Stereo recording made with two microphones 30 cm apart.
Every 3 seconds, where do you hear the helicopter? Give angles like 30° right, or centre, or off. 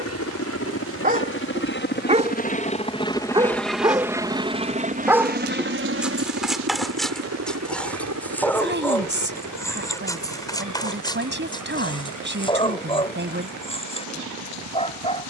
40° left, 10° right, 50° right, 70° right, 70° right.